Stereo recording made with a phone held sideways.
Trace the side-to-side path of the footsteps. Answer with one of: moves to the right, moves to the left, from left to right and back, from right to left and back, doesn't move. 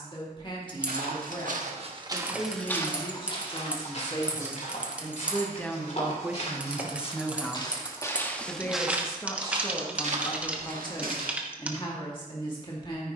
from right to left and back.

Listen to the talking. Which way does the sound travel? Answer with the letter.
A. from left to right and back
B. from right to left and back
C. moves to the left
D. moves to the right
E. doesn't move
A.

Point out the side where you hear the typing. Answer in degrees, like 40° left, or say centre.
10° right.